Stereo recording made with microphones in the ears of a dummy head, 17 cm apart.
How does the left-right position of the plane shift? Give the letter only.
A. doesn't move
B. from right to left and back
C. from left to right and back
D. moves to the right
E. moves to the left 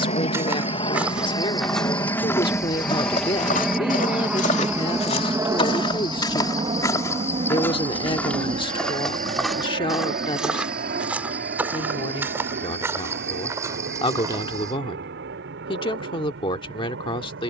D.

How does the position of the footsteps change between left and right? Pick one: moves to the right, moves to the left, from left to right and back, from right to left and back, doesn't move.
from right to left and back.